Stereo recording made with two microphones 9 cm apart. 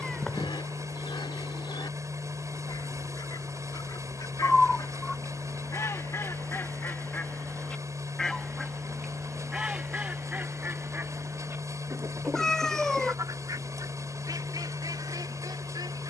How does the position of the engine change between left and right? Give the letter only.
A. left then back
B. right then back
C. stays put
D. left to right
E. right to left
C.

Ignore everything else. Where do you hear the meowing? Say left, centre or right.
centre.